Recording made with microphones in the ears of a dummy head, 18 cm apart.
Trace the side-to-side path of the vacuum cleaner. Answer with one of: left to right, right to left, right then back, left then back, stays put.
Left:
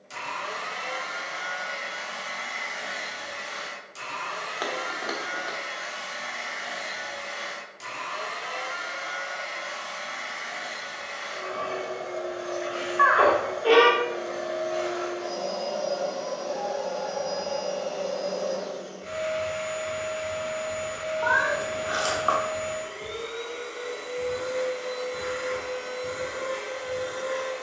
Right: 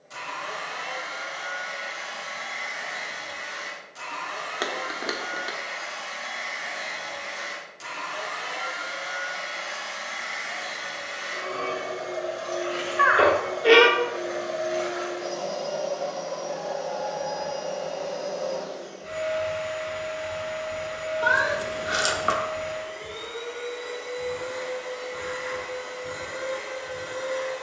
right then back.